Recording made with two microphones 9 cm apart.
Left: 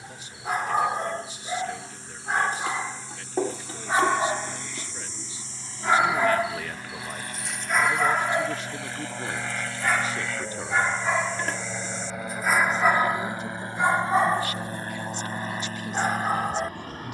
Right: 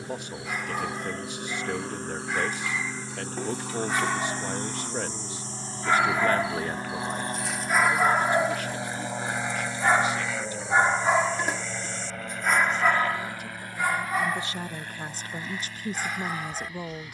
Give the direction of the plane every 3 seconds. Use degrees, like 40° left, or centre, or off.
60° right, 50° right, 30° right, centre, 20° left, 40° left.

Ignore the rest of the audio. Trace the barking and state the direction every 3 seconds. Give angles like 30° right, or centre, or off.
40° left, 30° left, centre, 20° right, 20° left, 40° left.